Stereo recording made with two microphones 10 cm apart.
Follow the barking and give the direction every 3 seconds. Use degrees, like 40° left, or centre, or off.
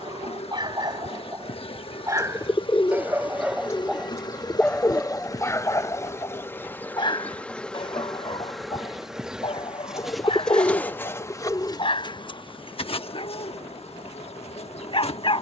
40° right, 10° left, 50° left, 60° left, 60° left.